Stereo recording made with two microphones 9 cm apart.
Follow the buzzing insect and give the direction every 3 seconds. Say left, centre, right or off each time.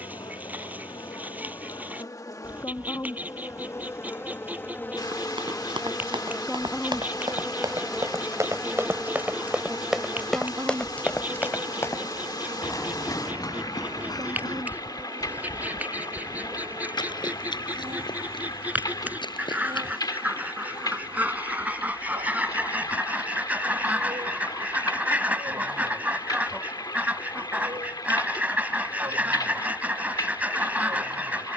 left, left, centre, right, right, right, right, right, right, right, right.